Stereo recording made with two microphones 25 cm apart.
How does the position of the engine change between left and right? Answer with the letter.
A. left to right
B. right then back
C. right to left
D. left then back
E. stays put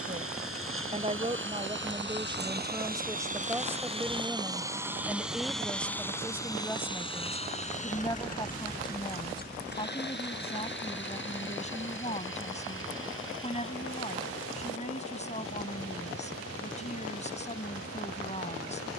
C.